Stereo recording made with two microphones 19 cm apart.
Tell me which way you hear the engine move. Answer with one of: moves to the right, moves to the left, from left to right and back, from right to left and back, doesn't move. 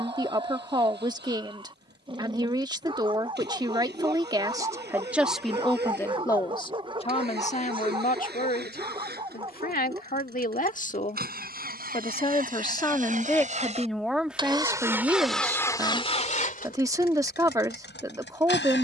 moves to the left.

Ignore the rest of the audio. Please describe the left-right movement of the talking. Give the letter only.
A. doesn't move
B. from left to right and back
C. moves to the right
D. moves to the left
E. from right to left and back
E.